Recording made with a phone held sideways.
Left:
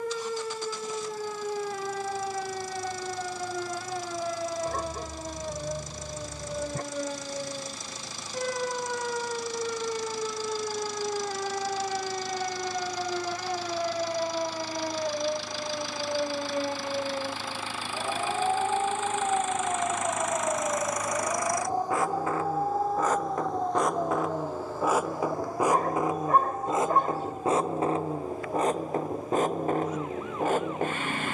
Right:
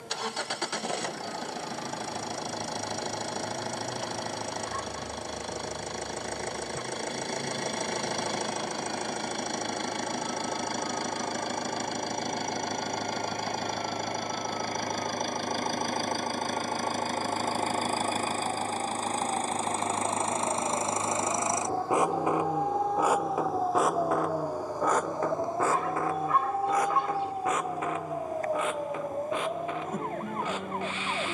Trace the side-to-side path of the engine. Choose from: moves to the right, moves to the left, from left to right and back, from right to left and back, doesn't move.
moves to the left.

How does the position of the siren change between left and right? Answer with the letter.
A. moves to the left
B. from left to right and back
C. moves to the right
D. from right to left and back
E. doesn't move
C.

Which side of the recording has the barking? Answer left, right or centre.
left.